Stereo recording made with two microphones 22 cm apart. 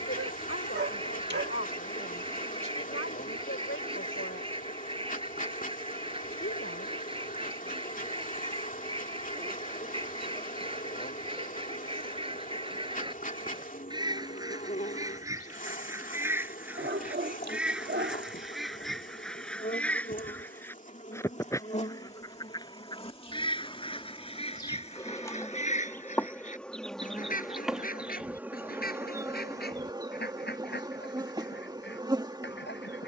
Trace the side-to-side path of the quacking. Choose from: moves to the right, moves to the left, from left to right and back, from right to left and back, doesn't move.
moves to the left.